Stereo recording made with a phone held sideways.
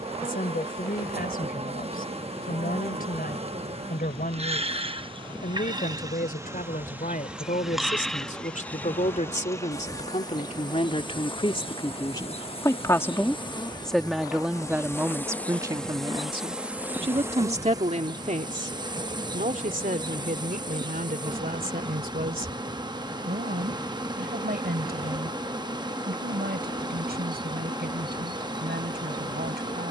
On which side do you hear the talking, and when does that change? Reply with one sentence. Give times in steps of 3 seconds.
In this clip you hear the talking on the left from 0 s, in the centre from 12 s and on the right from 15 s.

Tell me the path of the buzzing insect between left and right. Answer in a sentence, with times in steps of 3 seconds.
You can hear the buzzing insect on the right from 0 s, in the centre from 6 s, on the left from 9 s, in the centre from 15 s and on the right from 18 s.